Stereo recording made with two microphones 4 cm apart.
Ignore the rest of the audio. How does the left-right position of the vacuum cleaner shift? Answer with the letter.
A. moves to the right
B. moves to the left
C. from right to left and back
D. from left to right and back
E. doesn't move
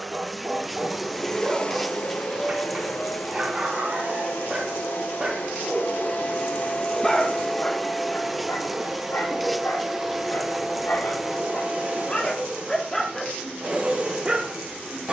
C.